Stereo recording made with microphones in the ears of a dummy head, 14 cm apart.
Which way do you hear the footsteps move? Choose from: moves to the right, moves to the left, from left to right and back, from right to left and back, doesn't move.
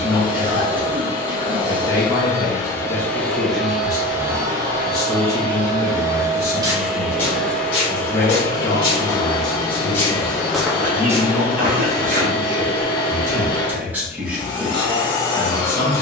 from right to left and back.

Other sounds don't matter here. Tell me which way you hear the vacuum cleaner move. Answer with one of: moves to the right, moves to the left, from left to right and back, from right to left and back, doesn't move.
from left to right and back.